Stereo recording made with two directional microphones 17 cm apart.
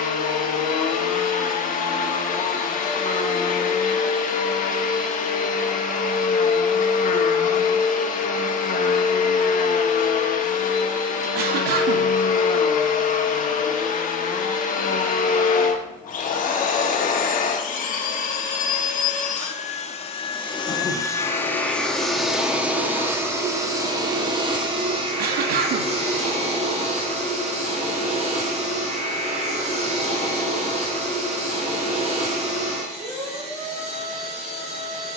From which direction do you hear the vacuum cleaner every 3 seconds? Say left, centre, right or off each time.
left, left, left, left, left, left, left, centre, right, right, right, right.